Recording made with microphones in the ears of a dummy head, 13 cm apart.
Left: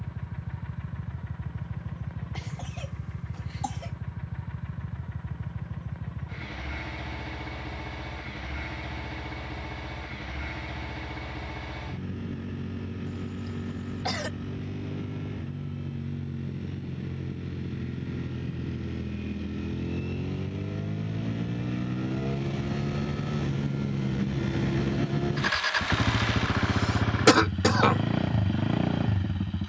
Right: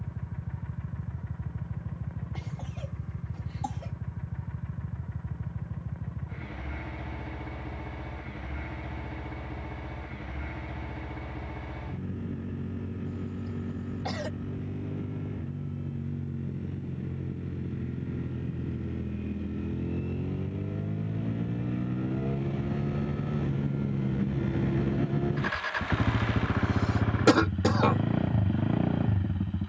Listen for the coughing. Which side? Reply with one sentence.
You can hear the coughing on the left.